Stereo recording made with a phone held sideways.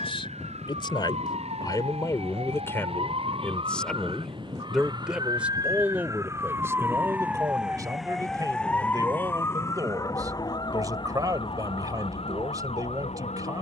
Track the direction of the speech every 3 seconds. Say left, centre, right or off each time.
left, centre, right, right, right.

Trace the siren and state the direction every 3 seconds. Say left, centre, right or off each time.
right, right, centre, left, left.